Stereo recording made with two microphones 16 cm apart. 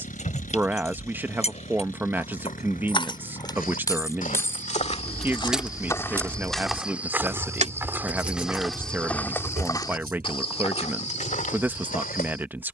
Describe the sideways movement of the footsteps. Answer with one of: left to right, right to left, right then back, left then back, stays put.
right then back.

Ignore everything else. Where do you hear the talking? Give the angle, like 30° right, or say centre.
10° right.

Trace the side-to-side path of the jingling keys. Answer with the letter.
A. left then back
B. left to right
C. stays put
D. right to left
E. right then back
B.